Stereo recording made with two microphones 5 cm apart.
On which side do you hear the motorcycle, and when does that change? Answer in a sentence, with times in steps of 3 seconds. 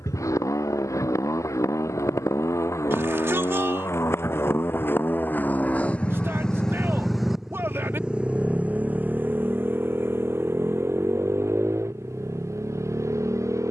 You can hear the motorcycle on the left from 0 s, in the centre from 6 s and on the right from 9 s.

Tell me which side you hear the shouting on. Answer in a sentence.
In this clip you hear the shouting on the right.